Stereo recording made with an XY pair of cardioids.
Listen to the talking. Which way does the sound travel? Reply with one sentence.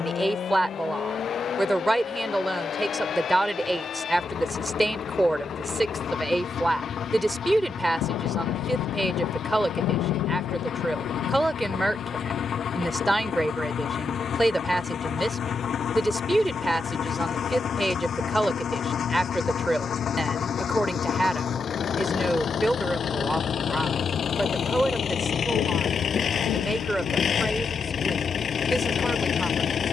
You can hear the talking stay in one place.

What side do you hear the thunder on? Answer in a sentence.
You can hear the thunder on the left.